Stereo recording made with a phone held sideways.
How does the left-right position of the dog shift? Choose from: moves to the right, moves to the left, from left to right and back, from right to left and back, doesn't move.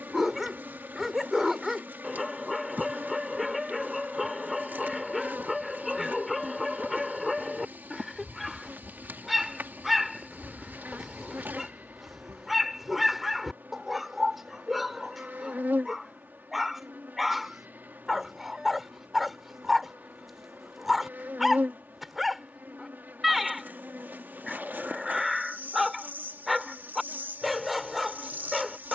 doesn't move.